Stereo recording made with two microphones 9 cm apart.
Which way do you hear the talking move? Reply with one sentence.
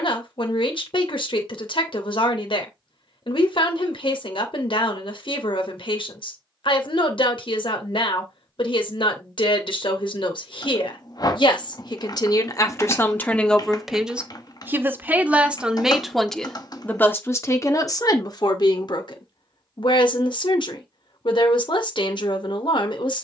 In this clip you hear the talking go right and come back.